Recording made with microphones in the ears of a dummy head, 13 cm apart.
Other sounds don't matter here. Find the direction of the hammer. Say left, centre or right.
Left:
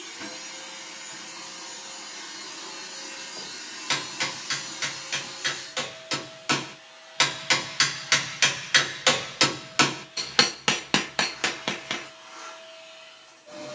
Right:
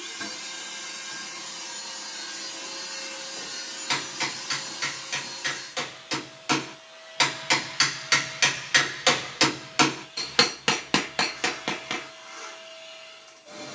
centre.